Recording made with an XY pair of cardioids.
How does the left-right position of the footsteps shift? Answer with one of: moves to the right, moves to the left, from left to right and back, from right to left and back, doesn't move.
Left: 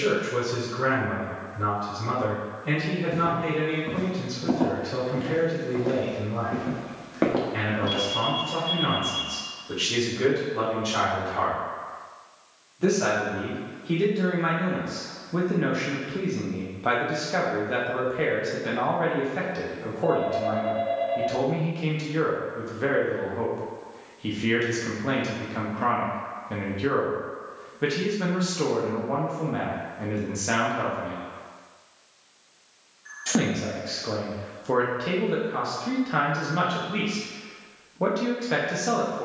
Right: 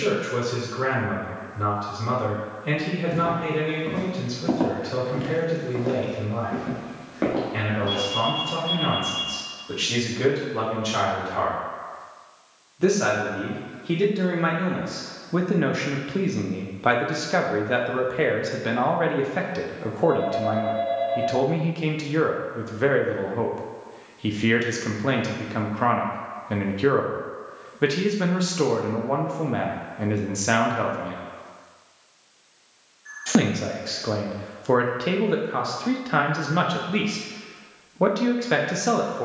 moves to the left.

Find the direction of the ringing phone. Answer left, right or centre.
centre.